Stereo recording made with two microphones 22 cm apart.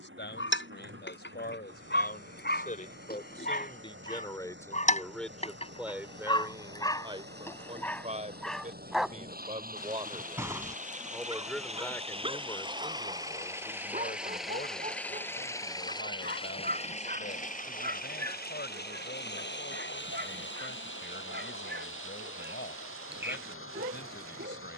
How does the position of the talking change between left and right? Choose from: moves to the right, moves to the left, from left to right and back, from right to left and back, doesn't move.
from left to right and back.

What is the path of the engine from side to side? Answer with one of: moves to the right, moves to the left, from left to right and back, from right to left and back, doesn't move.
moves to the left.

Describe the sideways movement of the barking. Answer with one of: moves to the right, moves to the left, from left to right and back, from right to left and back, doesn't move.
moves to the right.